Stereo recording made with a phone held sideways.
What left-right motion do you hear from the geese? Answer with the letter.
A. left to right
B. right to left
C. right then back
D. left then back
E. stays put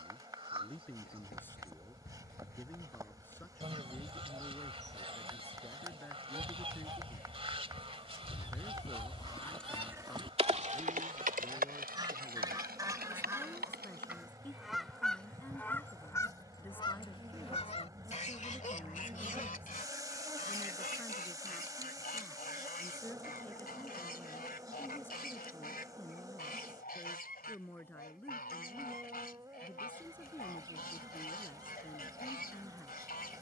B.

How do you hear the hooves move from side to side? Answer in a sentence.
In this clip you hear the hooves move from left to right.